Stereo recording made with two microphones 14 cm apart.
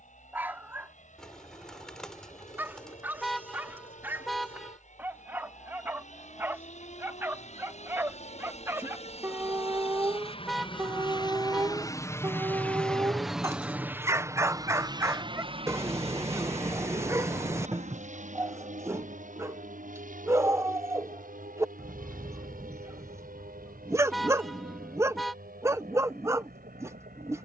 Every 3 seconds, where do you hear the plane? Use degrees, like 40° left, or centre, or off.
80° left, 70° left, 60° left, 40° left, 10° right, 50° right, 60° right, 70° right, 80° right.